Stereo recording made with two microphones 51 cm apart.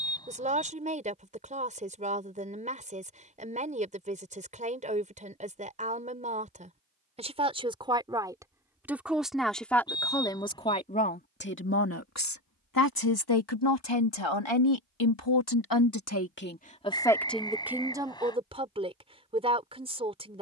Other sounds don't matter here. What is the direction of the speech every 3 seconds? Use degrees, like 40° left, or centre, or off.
20° right, 20° right, 10° right, 10° left, 60° left, 20° left, 10° right.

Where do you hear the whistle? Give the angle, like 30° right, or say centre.
10° left.